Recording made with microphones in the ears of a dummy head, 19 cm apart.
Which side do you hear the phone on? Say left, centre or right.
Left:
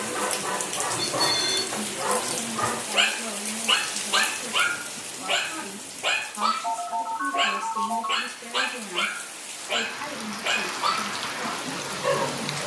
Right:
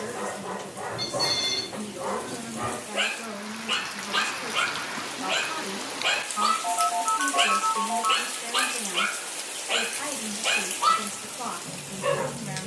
right.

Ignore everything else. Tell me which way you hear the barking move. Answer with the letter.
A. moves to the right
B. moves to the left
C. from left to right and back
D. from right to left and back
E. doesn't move
A.